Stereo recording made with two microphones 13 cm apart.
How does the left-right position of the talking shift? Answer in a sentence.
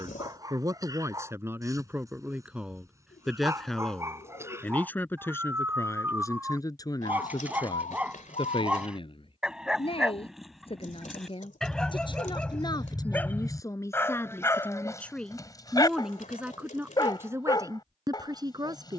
You can hear the talking go left and come back.